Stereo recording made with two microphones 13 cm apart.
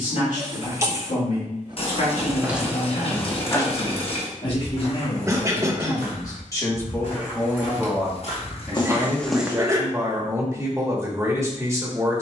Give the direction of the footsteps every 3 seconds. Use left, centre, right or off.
centre, left, left, centre.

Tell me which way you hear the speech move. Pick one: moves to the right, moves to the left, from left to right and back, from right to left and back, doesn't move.
moves to the right.